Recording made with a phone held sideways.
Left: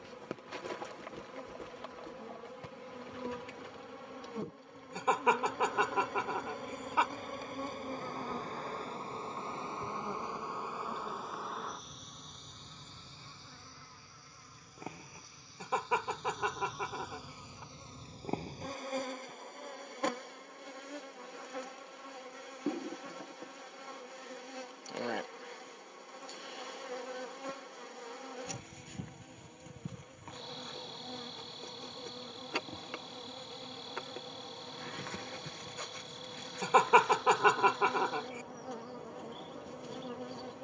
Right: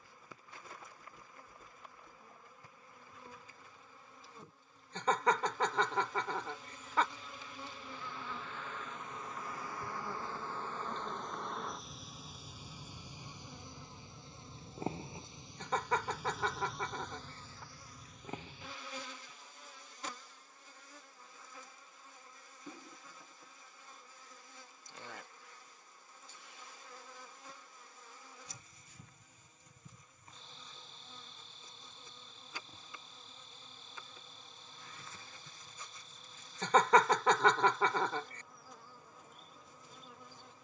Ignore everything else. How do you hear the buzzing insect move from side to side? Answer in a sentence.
In this clip you hear the buzzing insect move from left to right and back again.